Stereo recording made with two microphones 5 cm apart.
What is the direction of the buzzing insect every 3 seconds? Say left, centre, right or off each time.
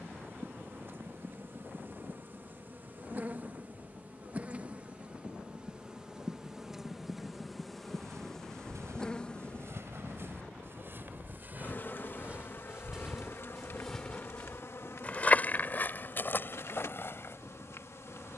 right, right, centre, left, left, left.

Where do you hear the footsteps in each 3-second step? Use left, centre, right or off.
off, off, right, right, centre, left.